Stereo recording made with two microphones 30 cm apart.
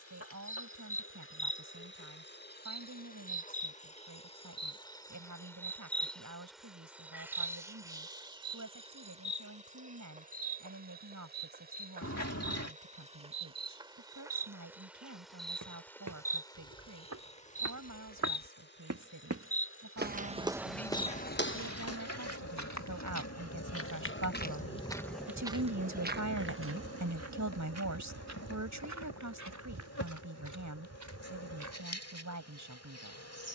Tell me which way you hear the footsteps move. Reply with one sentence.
You can hear the footsteps move from right to left and back again.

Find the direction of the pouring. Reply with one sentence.
You can hear the pouring on the left.